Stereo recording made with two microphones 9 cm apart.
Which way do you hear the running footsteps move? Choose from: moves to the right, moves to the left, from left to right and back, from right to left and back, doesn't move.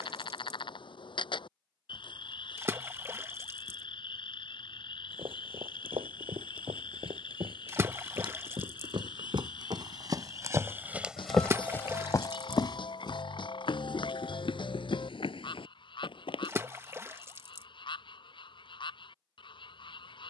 moves to the left.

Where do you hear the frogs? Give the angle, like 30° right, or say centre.
70° left.